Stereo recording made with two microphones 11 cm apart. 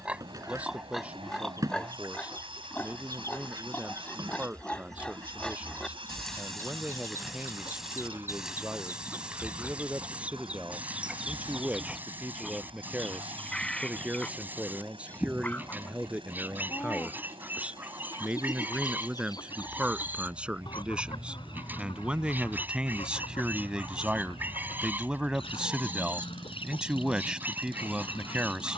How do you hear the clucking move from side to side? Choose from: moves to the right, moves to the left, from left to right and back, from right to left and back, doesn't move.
moves to the left.